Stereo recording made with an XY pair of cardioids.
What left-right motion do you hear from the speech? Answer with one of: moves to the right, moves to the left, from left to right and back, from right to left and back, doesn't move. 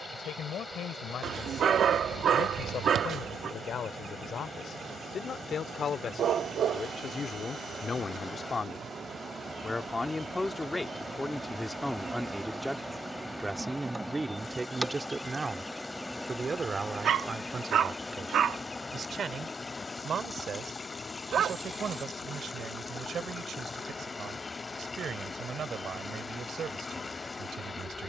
moves to the right.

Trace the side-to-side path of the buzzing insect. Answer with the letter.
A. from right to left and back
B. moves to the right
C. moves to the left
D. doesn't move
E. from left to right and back
C.